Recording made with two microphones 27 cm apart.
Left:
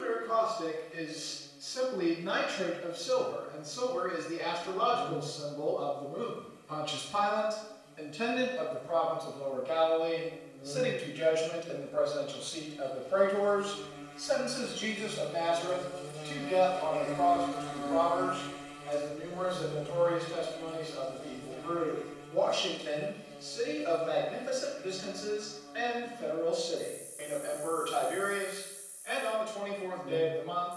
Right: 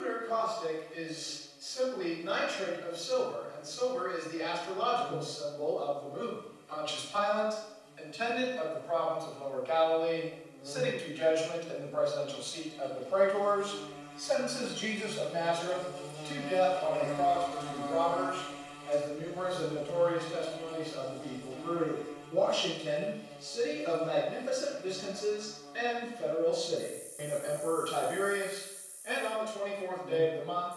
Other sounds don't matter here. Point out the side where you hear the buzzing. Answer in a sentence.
You can hear the buzzing on the left.